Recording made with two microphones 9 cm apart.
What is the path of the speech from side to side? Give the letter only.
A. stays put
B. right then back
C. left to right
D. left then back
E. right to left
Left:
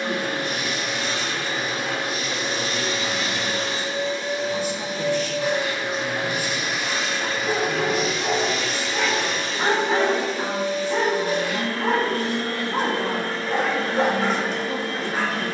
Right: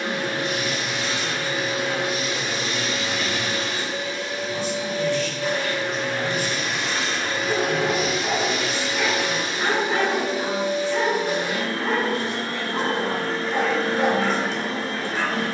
A.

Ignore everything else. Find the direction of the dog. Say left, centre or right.
left.